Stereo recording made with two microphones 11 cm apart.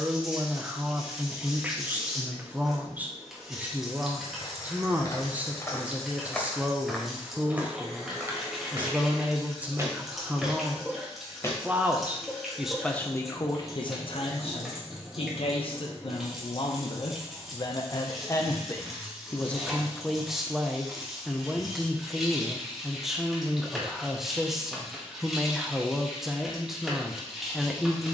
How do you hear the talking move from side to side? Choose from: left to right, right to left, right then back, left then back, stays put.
left then back.